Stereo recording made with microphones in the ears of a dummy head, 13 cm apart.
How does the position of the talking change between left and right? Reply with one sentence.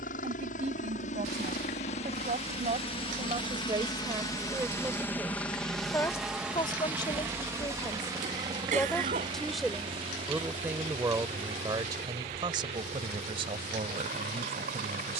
In this clip you hear the talking move from right to left and back again.